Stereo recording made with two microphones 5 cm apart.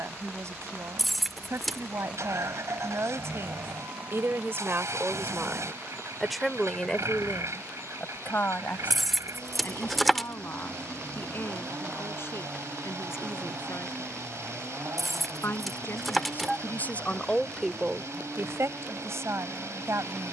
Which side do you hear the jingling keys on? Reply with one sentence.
In this clip you hear the jingling keys in the centre.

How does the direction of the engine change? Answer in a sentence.
You can hear the engine stay in one place.